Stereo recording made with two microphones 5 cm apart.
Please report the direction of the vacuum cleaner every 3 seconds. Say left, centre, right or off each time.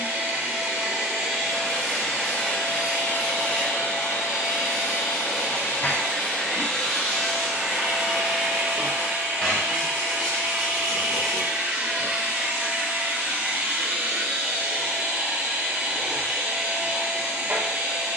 centre, left, centre, right, right, right.